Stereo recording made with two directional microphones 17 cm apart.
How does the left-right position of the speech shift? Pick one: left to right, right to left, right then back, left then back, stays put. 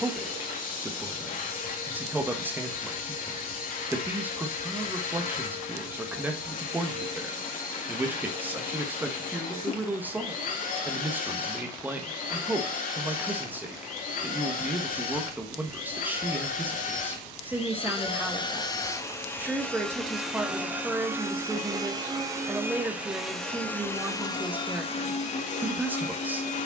stays put.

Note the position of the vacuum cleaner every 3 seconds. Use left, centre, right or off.
left, left, left, left, left, left, centre, centre, left.